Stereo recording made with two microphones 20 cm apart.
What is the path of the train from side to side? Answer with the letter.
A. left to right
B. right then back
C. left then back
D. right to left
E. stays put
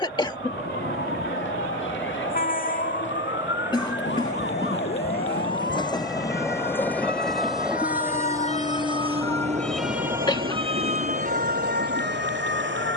A.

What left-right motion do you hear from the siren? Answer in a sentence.
In this clip you hear the siren travel towards the right.